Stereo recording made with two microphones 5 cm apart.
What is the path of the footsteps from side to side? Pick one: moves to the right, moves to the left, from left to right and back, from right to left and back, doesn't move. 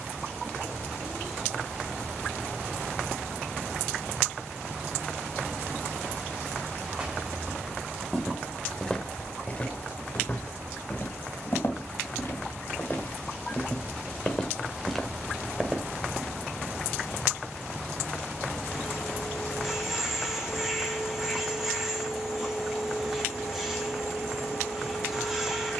from right to left and back.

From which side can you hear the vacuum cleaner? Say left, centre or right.
centre.